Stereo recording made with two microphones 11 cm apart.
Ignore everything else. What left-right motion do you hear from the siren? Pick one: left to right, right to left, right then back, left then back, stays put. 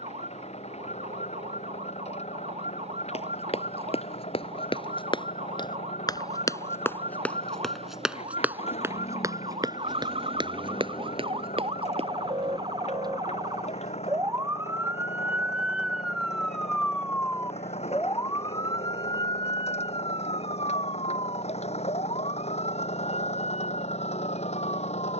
right to left.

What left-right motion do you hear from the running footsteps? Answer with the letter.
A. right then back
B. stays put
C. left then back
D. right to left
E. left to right
E.